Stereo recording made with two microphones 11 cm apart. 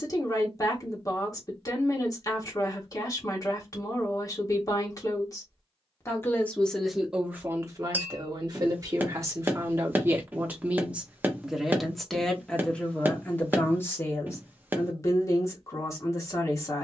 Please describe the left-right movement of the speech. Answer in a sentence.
In this clip you hear the speech go right and come back.